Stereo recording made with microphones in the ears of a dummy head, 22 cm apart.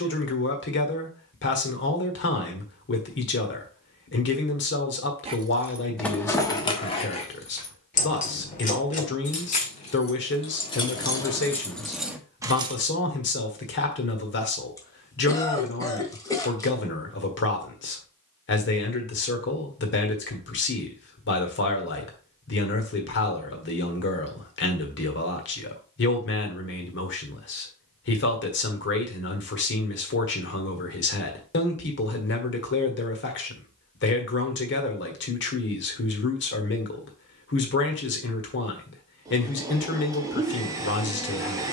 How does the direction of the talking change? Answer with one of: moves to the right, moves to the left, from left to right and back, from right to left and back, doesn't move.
doesn't move.